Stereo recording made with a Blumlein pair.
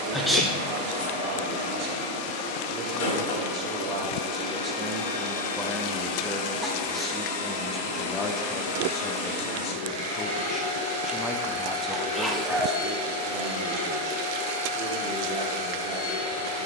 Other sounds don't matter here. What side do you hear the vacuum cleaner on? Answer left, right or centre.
left.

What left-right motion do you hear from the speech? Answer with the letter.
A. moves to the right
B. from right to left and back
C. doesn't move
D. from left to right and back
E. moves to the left
B.